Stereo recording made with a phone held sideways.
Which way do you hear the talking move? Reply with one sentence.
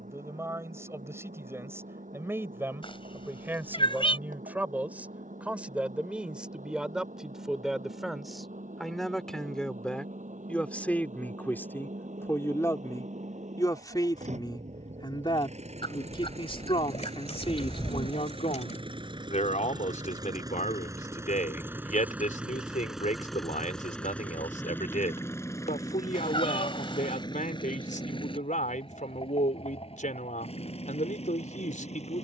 You can hear the talking go from the right side to the left.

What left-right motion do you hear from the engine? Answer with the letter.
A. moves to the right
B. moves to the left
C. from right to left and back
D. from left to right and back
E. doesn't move
B.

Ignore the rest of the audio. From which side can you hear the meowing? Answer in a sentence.
You can hear the meowing on the left.